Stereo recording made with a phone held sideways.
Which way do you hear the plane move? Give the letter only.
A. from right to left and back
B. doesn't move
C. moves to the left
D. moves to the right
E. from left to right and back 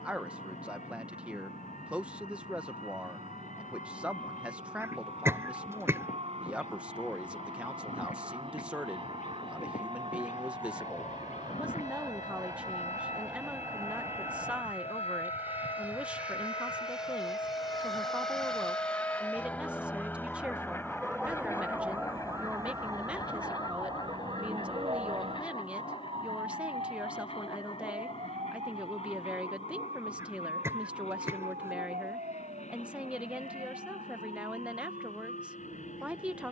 C.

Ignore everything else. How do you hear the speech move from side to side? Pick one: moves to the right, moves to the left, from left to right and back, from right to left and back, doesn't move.
doesn't move.